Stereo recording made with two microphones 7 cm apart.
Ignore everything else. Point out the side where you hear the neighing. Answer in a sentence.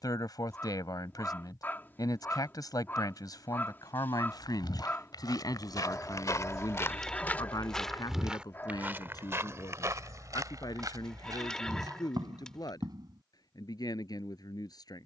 In this clip you hear the neighing in the centre.